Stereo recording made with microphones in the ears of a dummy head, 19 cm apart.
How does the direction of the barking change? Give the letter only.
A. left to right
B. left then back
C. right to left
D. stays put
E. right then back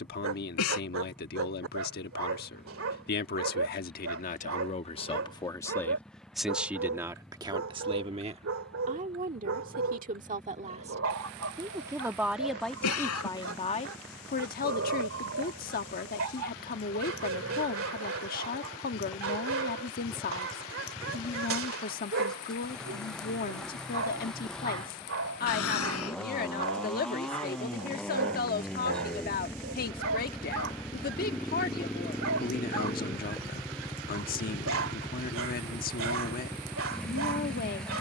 D.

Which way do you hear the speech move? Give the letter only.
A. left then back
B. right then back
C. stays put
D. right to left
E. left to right
B.